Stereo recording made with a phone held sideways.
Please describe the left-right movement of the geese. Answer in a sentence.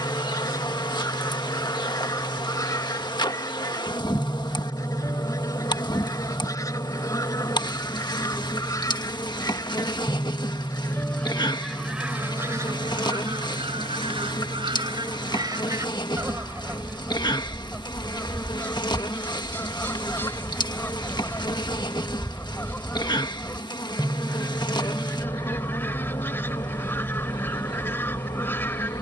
In this clip you hear the geese go right and come back.